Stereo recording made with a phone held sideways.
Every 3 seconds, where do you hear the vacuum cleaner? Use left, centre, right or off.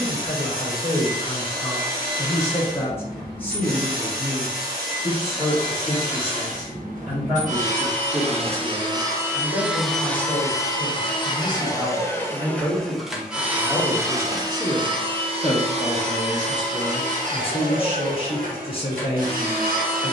right, right, right, centre, centre, right, right.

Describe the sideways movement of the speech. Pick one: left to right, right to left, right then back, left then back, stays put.
right then back.